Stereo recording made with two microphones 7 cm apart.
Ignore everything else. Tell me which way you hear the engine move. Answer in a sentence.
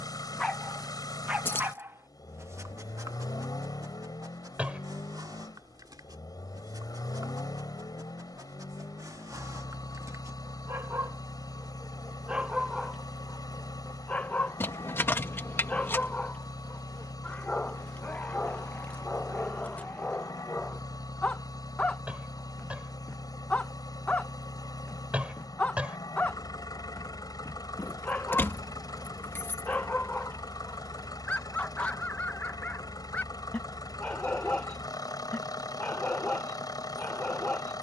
You can hear the engine stay put.